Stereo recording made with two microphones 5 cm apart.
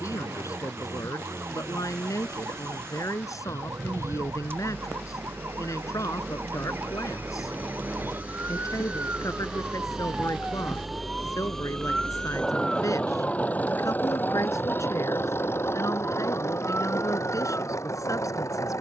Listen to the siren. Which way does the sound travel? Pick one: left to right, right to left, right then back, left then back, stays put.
right to left.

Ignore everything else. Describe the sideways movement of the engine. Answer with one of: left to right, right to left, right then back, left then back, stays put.
right to left.